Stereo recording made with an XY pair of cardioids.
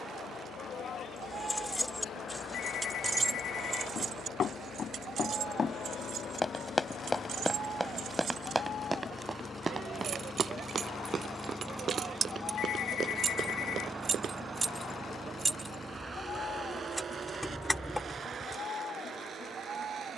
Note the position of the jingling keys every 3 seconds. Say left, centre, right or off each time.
centre, right, right, right, right, centre, centre.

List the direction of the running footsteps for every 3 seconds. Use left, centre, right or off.
off, left, centre, right, right, off, off.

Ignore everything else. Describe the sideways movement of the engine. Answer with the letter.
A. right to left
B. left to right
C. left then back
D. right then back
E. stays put
B.